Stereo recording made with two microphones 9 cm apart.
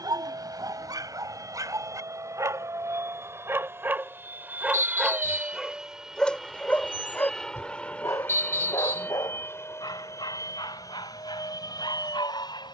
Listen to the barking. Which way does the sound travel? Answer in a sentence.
You can hear the barking move to the left.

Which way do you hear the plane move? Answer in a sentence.
You can hear the plane go from the right side to the left.